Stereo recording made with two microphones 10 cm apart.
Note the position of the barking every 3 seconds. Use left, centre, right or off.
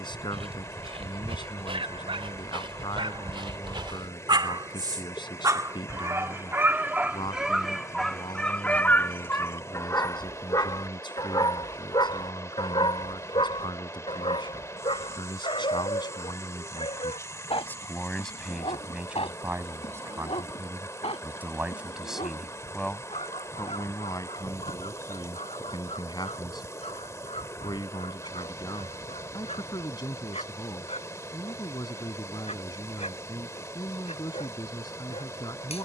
right, right, centre, left, left, left, left, left, left, left, left, left.